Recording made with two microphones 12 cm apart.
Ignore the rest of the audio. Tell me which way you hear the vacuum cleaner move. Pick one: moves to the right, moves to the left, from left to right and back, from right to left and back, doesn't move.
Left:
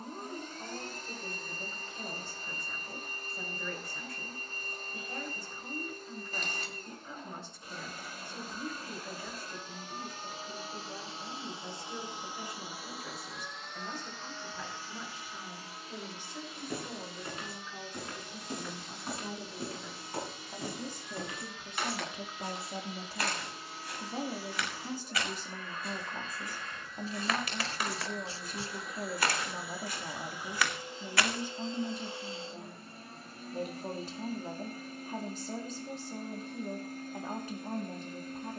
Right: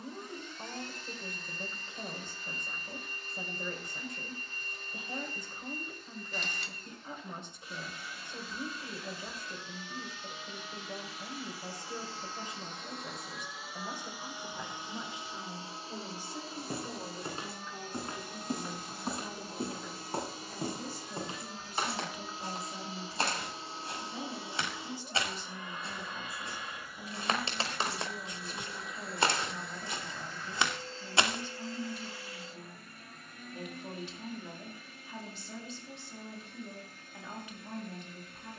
from left to right and back.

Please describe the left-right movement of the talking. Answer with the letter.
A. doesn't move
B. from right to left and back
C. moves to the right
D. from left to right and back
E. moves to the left
E.